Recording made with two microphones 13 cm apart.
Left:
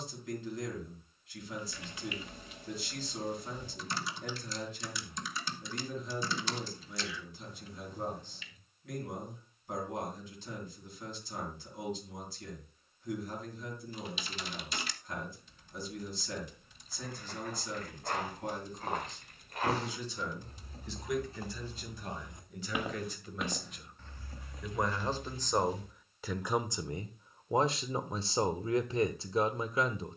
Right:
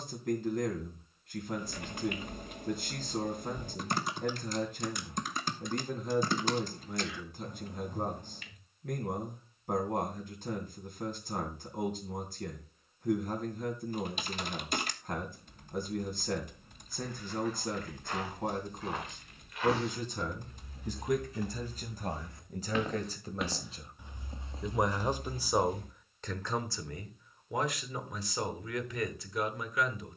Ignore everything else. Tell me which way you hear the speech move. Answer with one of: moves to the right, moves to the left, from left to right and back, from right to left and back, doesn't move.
moves to the left.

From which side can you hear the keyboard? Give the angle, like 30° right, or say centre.
50° right.